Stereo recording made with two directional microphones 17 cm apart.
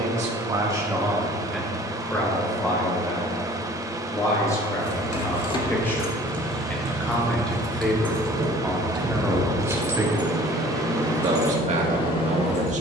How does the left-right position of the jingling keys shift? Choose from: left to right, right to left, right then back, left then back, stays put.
right then back.